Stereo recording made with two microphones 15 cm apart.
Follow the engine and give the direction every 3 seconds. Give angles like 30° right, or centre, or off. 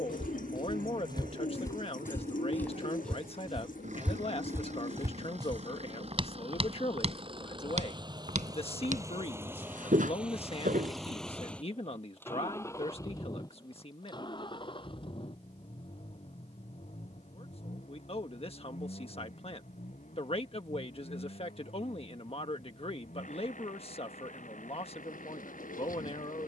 70° right, 60° right, 40° right, centre, 30° left, 50° left, 60° left, 60° left, 70° left.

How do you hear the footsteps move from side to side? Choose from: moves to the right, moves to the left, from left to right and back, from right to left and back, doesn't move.
moves to the right.